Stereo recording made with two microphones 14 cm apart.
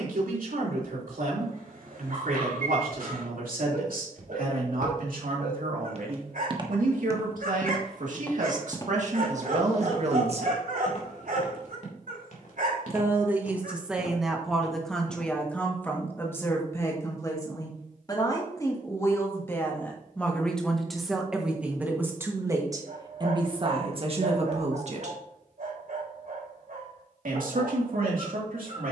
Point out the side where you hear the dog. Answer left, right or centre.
right.